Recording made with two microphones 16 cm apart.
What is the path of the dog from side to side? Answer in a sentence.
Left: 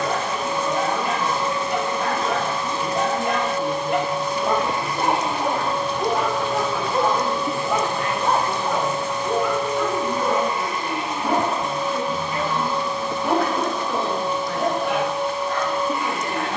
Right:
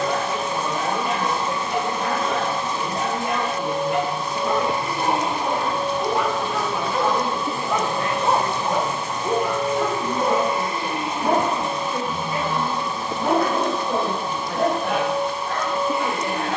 In this clip you hear the dog move to the right.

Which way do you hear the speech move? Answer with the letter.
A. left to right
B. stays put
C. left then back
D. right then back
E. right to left
B.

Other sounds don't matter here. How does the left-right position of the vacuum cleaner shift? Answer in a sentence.
In this clip you hear the vacuum cleaner stay in one place.